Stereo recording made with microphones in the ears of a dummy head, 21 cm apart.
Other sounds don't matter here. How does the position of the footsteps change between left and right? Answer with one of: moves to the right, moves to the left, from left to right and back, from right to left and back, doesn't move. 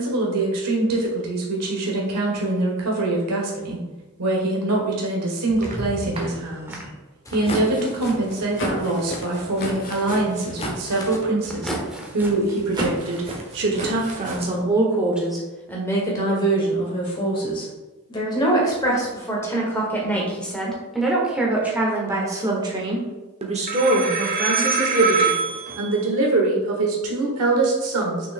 from right to left and back.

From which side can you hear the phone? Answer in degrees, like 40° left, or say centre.
40° right.